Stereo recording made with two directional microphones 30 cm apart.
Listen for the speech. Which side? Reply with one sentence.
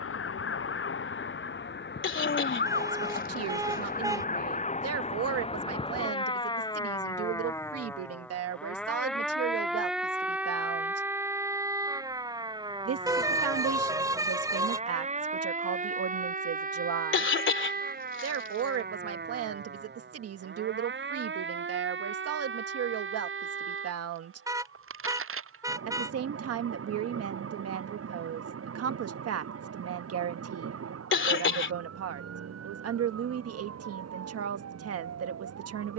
In this clip you hear the speech on the right.